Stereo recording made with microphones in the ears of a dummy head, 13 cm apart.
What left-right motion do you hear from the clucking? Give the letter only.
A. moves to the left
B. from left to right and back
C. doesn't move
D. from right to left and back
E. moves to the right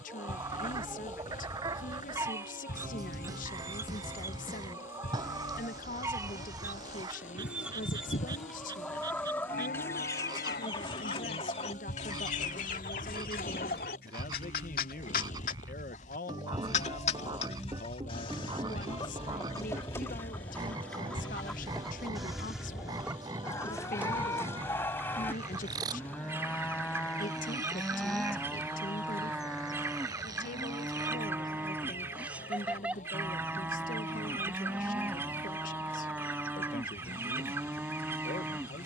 D.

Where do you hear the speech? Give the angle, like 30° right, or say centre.
60° left.